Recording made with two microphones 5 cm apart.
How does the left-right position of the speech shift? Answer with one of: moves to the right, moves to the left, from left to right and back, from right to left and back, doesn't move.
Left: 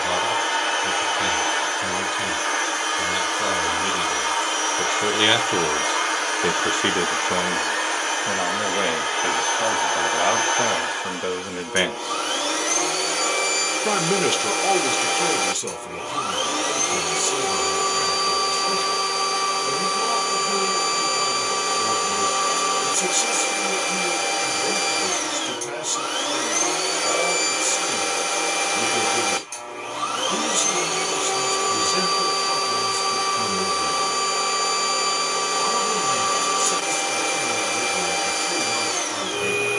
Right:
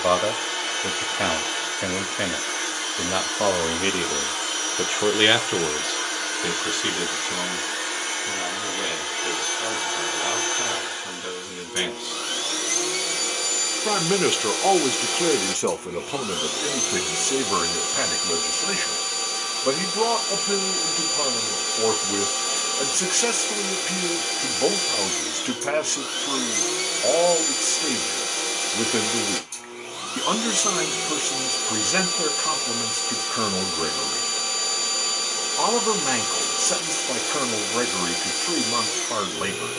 from right to left and back.